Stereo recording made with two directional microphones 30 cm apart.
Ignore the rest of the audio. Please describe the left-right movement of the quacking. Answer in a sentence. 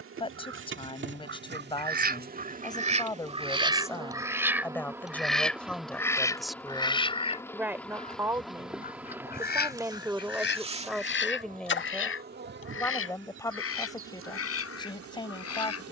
You can hear the quacking go from the right side to the left.